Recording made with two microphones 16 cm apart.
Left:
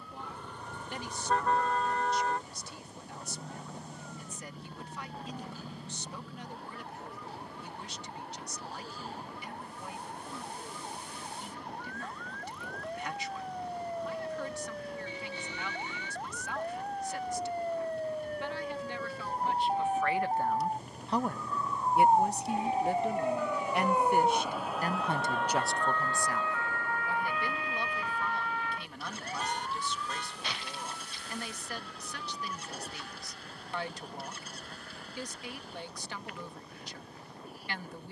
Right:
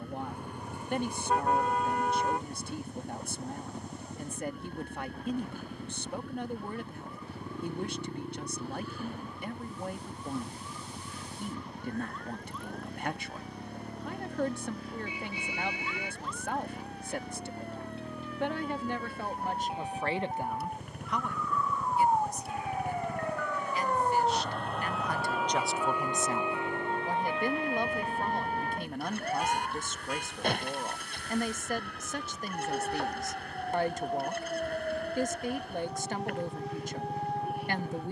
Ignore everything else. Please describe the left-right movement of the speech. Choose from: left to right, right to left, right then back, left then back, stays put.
left then back.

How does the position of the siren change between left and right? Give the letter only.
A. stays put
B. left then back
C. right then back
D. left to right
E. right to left
D.